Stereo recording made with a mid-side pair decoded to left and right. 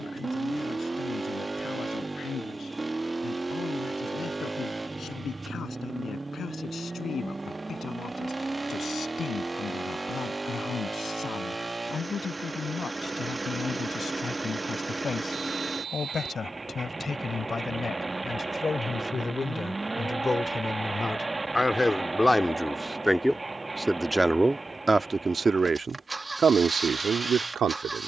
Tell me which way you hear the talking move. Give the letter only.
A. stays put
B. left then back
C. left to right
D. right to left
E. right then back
C.